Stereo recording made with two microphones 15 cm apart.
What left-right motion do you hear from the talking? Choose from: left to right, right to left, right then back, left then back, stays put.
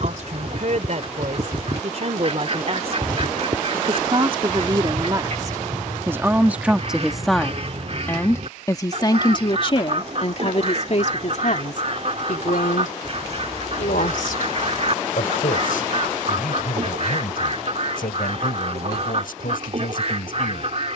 right to left.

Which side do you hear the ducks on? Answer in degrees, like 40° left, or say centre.
50° right.